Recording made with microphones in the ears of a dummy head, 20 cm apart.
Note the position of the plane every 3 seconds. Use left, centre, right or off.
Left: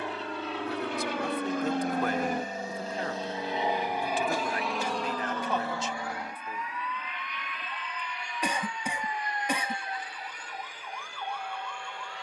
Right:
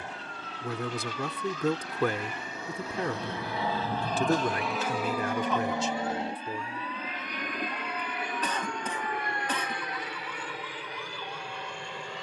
left, centre, right, right.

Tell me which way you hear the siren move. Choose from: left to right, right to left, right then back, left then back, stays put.
right to left.